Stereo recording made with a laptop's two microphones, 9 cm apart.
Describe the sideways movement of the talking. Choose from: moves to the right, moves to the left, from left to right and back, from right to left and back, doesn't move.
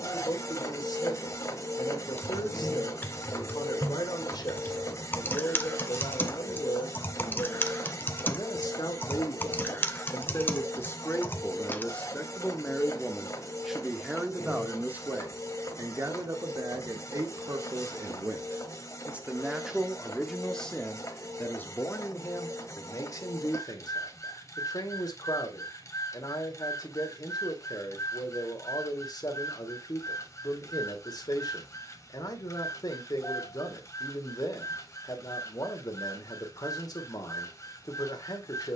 from left to right and back.